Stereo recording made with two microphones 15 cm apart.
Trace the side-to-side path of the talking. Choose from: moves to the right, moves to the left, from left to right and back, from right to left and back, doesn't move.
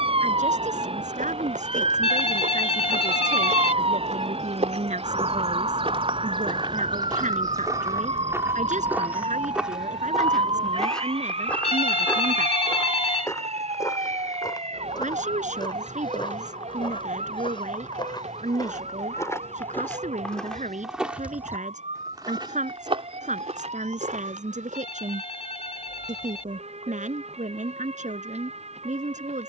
doesn't move.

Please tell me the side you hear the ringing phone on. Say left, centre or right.
left.